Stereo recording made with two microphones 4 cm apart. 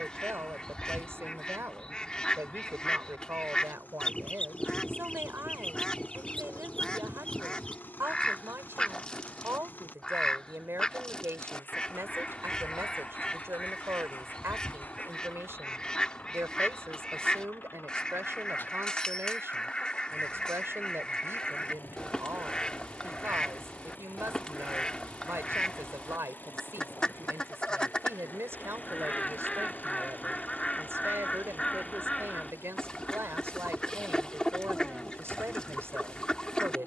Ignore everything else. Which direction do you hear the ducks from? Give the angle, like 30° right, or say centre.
20° left.